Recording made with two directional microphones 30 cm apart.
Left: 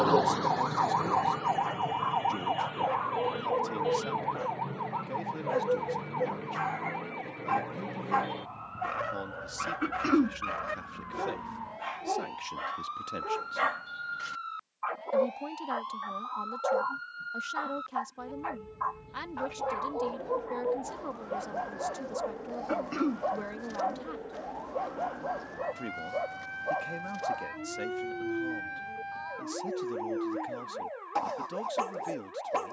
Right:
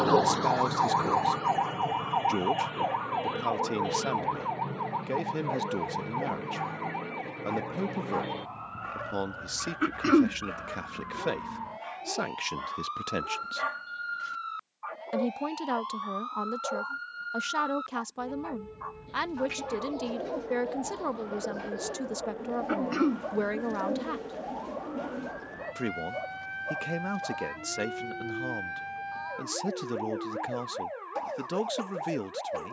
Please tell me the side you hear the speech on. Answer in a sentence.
In this clip you hear the speech on the right.